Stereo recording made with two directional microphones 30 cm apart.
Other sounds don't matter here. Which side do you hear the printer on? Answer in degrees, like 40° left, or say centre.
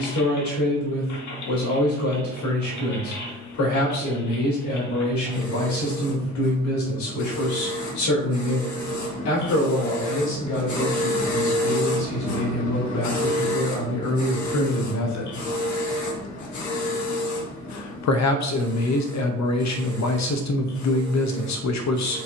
70° left.